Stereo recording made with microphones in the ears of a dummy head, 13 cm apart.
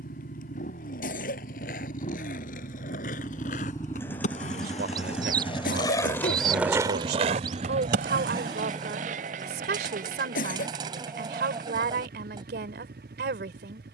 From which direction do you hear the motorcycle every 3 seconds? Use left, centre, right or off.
left, centre, right, right, right.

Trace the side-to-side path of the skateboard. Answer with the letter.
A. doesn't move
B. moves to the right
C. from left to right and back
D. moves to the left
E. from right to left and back
B.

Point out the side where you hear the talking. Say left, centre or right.
right.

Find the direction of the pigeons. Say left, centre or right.
right.